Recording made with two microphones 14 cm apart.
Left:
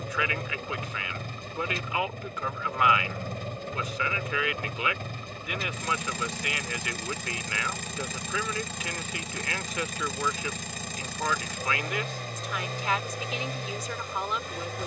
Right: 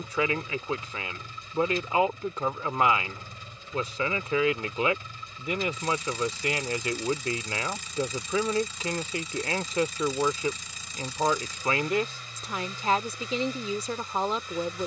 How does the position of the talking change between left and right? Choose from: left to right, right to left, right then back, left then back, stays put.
stays put.